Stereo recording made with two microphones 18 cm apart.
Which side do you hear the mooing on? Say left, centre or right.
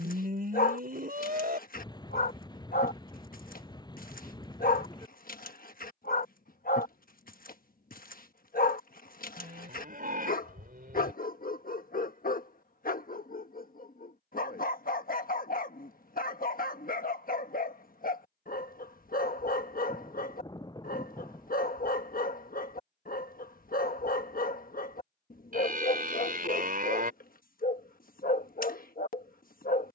right.